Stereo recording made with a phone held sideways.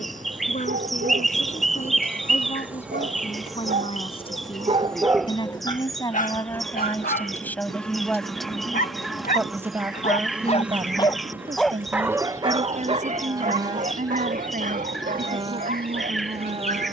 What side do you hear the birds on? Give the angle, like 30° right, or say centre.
centre.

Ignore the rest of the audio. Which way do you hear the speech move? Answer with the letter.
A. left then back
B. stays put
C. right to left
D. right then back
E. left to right
E.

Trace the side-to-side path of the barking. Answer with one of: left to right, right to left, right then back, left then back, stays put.
left then back.